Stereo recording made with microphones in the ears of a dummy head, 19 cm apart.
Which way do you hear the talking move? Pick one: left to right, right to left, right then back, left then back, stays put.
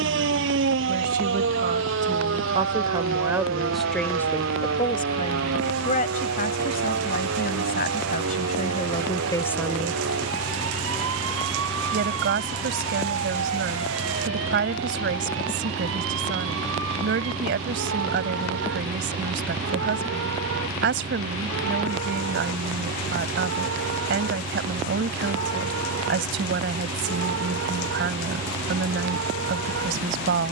left then back.